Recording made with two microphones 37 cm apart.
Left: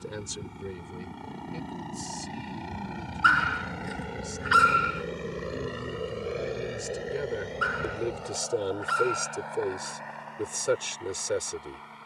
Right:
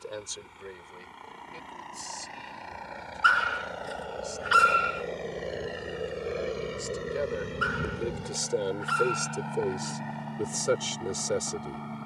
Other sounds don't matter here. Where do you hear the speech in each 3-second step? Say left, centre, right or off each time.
left, left, left, centre.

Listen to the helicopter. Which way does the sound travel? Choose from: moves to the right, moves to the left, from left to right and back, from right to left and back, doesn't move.
moves to the right.